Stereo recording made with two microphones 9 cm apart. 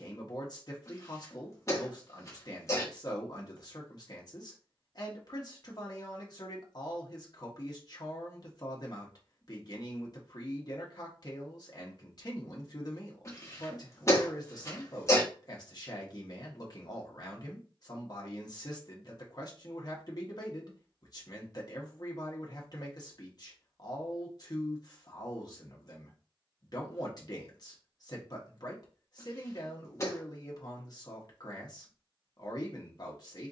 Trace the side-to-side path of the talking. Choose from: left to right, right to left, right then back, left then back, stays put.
stays put.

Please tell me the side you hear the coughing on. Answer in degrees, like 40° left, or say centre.
30° left.